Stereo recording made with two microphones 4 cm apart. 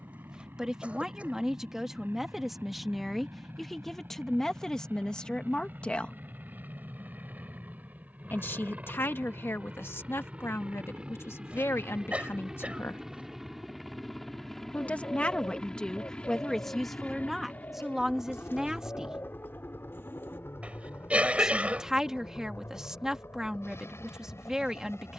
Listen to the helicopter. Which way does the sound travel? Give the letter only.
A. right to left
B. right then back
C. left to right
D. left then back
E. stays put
A.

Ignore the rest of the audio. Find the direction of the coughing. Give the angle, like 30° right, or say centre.
30° right.